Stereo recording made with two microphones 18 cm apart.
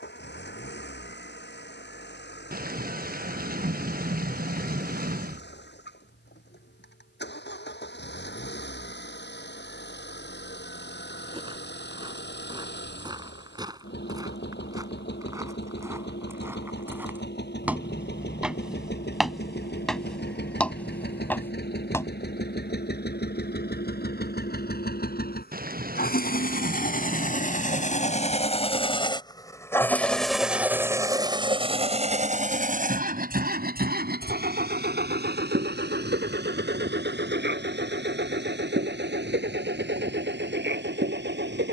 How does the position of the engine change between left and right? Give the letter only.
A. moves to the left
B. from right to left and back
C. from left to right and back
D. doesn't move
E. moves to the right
E.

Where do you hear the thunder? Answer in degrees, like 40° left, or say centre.
60° right.